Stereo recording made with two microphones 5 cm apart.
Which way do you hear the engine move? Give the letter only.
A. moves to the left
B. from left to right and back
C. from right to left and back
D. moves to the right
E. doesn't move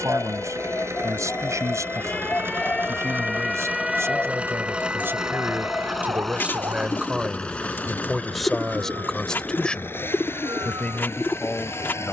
A.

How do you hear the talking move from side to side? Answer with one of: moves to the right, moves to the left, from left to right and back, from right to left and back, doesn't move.
moves to the left.